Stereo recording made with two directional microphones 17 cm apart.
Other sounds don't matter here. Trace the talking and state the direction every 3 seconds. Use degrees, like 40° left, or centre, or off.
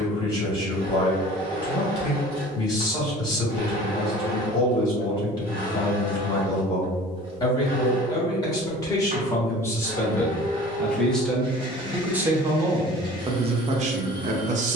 20° left, 20° left, 20° left, 10° left, 30° right.